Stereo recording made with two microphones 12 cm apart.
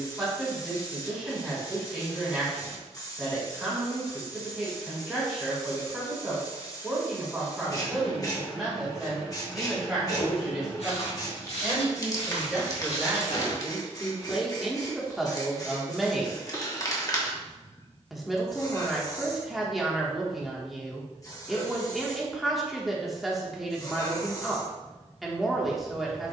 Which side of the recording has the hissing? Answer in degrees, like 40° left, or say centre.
30° left.